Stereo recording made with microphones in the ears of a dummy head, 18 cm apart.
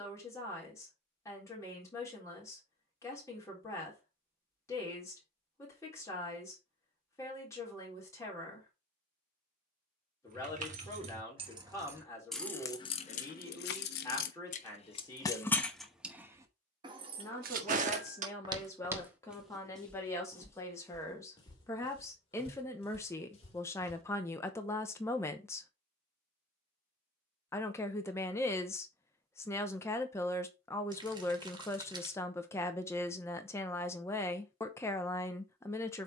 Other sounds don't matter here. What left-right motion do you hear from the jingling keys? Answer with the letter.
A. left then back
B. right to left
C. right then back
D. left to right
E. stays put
A.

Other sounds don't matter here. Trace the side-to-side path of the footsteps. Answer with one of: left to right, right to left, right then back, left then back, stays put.
right to left.